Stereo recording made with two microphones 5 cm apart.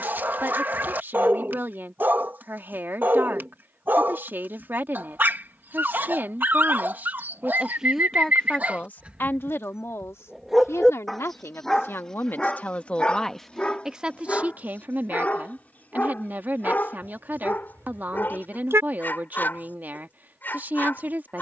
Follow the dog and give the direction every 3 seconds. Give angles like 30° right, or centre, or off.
40° right, 40° right, 40° right, 10° right, 20° left, 30° left, 40° left.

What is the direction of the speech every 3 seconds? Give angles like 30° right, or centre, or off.
40° right, 40° right, 10° right, 60° left, centre, 40° right, 40° right.